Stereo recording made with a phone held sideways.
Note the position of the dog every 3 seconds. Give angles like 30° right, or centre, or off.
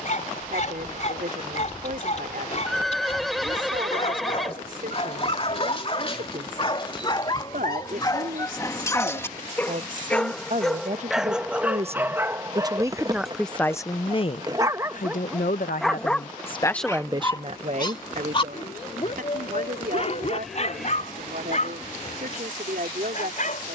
50° left, 40° left, 30° left, centre, 20° right, 10° left, 40° left, 50° left.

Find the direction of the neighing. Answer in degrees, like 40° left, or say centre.
centre.